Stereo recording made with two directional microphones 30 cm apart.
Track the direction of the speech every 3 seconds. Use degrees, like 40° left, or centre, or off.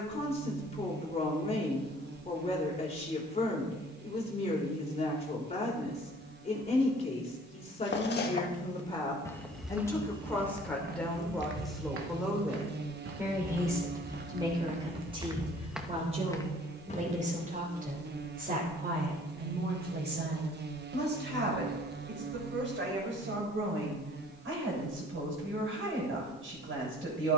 20° left, 20° left, 20° left, 10° left, 10° right, 20° right, 30° right, 40° right, 50° right.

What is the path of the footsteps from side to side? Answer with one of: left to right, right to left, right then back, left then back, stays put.
right then back.